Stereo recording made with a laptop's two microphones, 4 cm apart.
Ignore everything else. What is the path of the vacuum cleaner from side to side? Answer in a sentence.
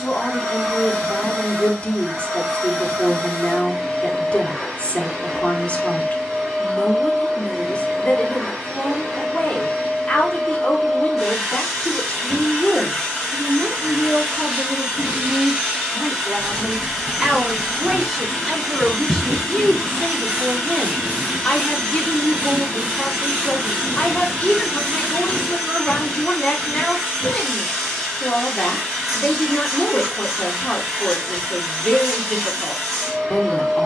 You can hear the vacuum cleaner stay put.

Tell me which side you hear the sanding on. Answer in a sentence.
You can hear the sanding on the right.